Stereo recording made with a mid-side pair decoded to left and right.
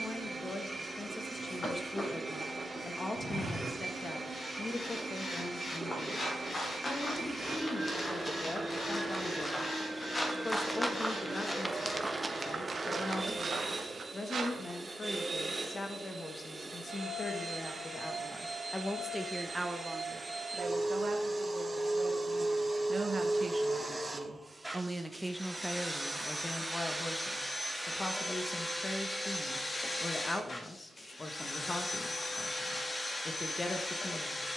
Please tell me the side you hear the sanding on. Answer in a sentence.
You can hear the sanding on the left.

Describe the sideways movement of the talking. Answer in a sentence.
In this clip you hear the talking go right and come back.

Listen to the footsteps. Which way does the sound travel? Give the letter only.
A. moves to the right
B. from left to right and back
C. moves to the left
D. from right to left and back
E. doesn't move
A.